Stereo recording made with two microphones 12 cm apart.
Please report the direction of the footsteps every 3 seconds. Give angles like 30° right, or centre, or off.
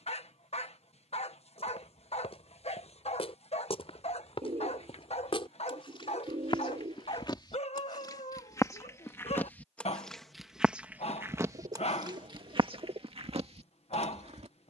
60° left, 50° left, 40° left, 10° right, 60° right.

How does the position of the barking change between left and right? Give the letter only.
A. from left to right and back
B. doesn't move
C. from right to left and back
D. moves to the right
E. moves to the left
B.